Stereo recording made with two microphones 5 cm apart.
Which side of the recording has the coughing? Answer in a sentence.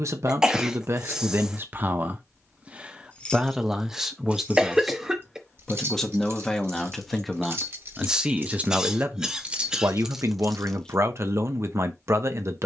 You can hear the coughing in the centre.